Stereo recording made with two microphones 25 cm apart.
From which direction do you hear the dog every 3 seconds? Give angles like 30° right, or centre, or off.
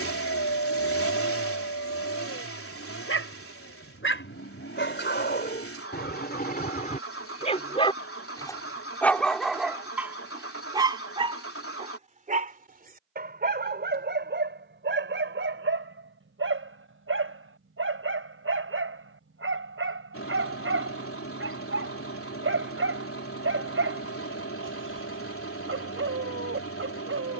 60° left, 50° left, 30° left, 10° right, 40° right, 50° right, 60° right, 60° right, 60° right.